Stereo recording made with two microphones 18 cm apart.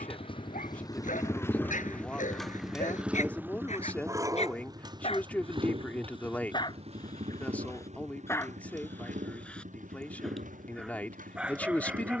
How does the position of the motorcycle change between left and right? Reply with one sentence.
In this clip you hear the motorcycle move to the right.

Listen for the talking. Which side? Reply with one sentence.
In this clip you hear the talking in the centre.